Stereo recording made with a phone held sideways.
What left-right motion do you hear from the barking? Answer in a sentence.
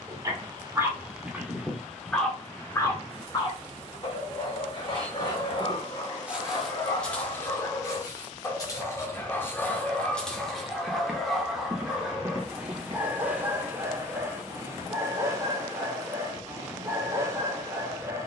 You can hear the barking go left and come back.